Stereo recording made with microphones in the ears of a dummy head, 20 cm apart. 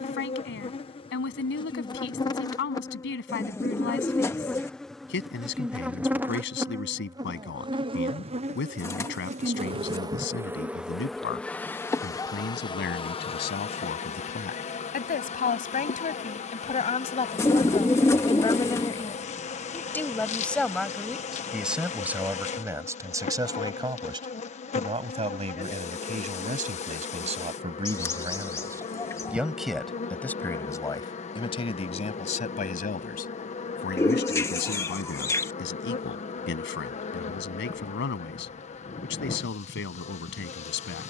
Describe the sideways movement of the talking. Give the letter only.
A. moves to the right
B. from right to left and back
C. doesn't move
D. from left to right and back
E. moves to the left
D.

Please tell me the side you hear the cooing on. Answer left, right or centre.
centre.